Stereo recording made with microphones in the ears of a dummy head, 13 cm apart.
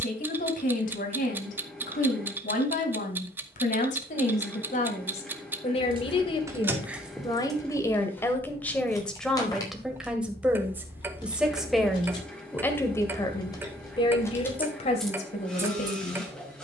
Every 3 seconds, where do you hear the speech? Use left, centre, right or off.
left, left, left, centre, left, left.